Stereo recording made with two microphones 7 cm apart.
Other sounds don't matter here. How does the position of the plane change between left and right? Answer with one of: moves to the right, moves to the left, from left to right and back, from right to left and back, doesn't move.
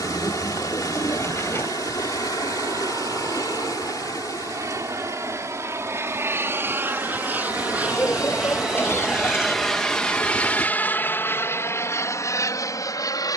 moves to the left.